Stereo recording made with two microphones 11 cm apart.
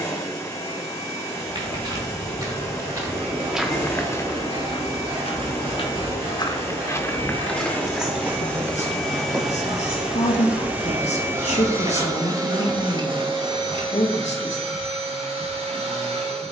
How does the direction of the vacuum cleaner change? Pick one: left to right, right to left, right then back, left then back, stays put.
left to right.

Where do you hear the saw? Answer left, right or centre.
right.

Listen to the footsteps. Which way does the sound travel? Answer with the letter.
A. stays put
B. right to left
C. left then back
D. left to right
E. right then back
C.